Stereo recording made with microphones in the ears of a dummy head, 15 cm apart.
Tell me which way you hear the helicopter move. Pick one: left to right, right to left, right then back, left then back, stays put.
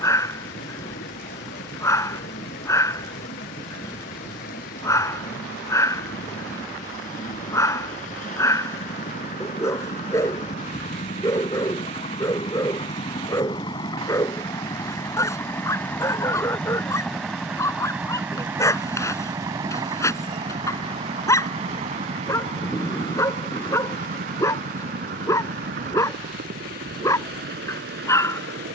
left to right.